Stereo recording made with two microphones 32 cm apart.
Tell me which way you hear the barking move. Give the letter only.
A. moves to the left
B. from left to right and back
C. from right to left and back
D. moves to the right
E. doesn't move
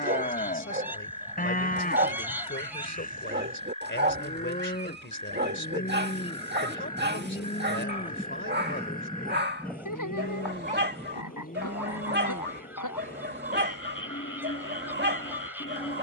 E.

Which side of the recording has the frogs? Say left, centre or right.
left.